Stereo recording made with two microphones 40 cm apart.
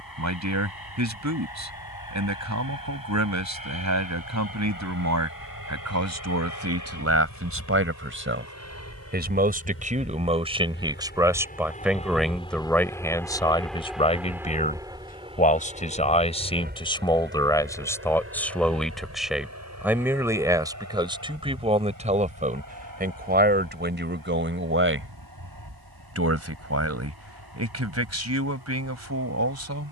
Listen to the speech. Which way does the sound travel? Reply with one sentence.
You can hear the speech go left and come back.